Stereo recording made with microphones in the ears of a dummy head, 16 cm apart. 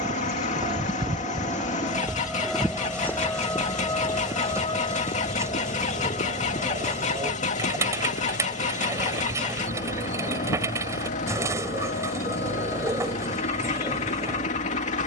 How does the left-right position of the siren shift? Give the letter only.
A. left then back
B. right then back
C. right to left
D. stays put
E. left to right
C.